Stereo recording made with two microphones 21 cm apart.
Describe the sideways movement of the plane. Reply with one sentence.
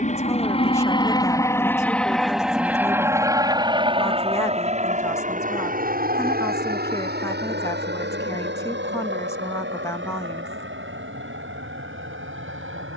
In this clip you hear the plane move to the right.